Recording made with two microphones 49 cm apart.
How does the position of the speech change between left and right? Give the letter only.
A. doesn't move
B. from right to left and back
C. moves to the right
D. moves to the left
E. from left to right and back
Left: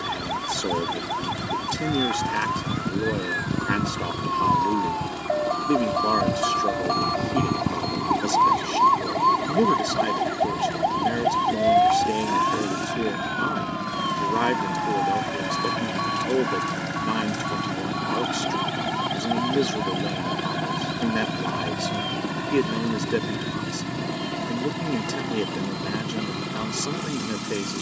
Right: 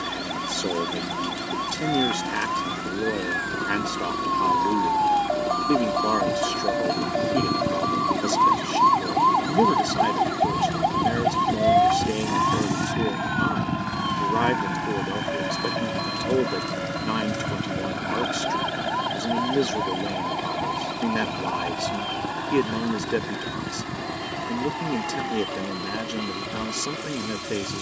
A.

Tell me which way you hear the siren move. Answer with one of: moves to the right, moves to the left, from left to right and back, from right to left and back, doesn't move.
moves to the right.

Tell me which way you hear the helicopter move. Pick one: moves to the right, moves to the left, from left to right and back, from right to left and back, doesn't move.
moves to the left.